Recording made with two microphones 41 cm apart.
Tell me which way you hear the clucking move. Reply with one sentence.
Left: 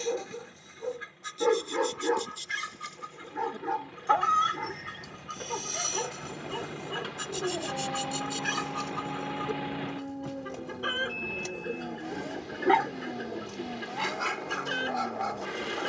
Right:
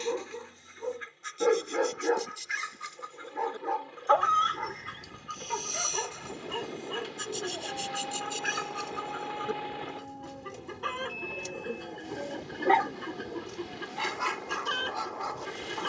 In this clip you hear the clucking travel towards the right.